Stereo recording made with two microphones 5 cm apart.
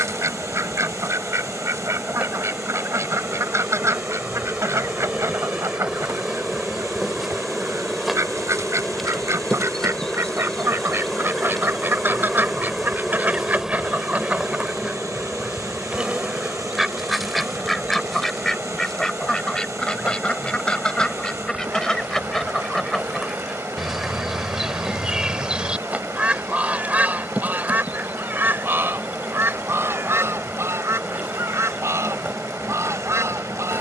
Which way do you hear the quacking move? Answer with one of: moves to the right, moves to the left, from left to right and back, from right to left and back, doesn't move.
from right to left and back.